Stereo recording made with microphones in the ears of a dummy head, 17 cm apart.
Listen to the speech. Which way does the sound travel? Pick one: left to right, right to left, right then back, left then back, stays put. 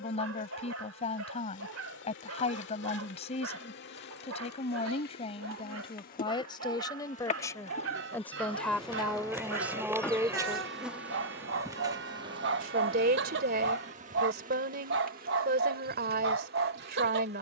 left to right.